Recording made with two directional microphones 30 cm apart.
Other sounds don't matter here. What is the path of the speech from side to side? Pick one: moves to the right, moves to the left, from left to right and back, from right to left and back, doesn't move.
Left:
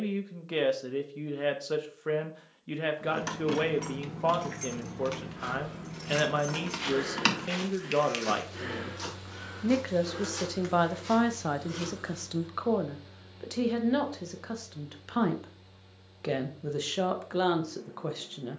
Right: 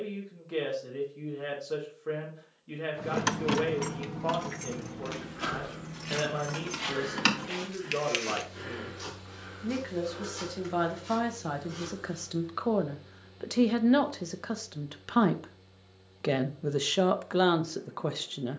moves to the right.